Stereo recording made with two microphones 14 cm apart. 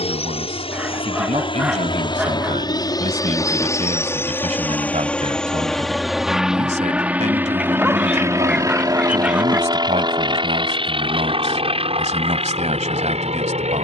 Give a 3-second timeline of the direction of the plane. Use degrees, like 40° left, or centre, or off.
40° left, 10° left, 10° right, 30° right, 40° right.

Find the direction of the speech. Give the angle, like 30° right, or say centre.
50° right.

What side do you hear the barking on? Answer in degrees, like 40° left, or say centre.
10° right.